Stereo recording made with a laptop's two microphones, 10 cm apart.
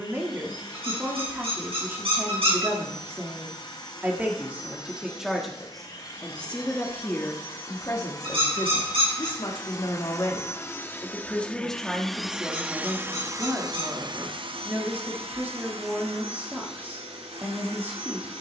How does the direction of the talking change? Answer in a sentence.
In this clip you hear the talking go left and come back.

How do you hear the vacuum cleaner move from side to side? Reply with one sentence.
In this clip you hear the vacuum cleaner move from left to right.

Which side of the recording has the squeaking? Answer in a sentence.
In this clip you hear the squeaking on the right.